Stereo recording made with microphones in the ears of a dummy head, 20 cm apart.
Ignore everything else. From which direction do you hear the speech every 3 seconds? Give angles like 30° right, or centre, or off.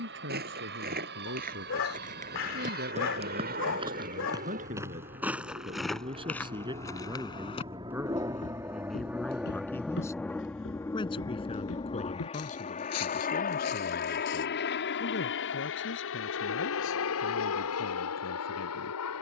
50° right, 30° right, 10° right, 20° left, 40° left, 50° left, 60° left.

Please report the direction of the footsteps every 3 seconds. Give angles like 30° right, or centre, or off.
40° right, 10° right, 20° left, 50° left, 70° left, off, off.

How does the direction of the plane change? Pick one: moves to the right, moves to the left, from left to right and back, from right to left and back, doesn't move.
moves to the left.